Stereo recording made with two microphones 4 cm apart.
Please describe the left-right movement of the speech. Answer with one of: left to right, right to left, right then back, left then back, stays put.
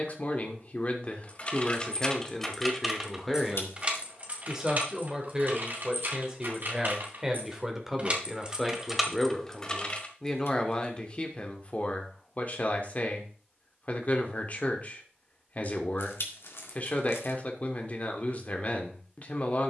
right then back.